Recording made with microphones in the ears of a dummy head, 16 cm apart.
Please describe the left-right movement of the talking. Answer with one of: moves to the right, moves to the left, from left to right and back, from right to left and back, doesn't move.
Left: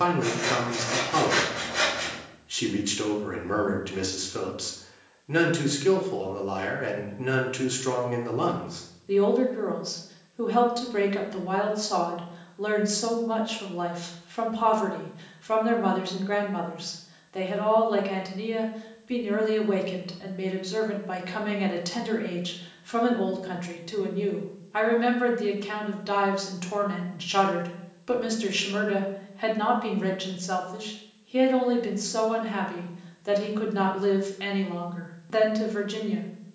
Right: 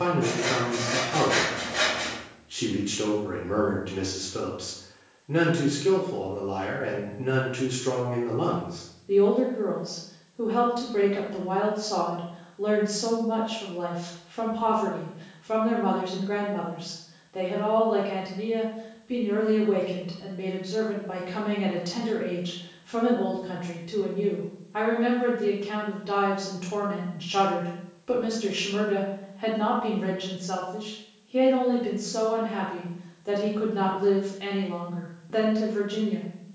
doesn't move.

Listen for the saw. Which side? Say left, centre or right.
centre.